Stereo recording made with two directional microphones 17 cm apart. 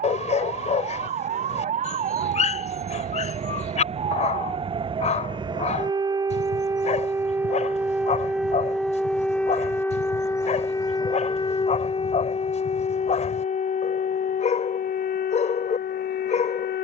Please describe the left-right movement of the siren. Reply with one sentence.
You can hear the siren travel towards the left.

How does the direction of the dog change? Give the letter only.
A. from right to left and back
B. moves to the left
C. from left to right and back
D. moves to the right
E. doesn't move
E.